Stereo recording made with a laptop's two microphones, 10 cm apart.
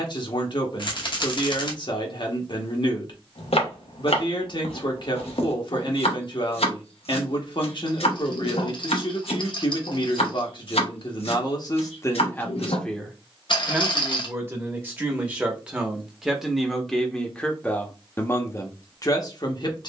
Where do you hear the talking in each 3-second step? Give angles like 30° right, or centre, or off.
50° left, 50° left, 50° left, 50° left, centre, centre, 40° left.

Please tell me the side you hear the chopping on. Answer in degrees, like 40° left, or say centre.
90° left.